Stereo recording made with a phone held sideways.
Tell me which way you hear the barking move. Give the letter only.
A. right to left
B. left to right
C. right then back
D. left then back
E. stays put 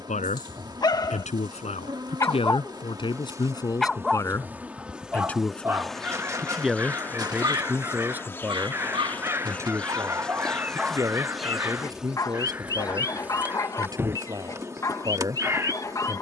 C.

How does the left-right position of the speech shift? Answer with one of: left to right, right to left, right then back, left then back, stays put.
left to right.